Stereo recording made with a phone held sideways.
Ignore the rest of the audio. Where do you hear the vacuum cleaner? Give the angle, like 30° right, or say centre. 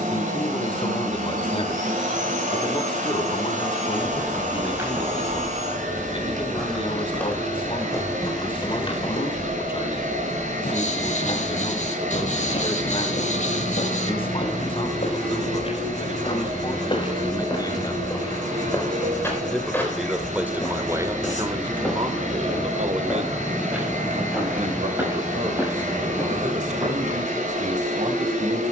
80° right.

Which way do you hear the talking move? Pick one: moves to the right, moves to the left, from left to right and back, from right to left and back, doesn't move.
moves to the right.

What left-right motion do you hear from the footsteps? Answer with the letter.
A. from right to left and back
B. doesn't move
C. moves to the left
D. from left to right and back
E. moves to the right
A.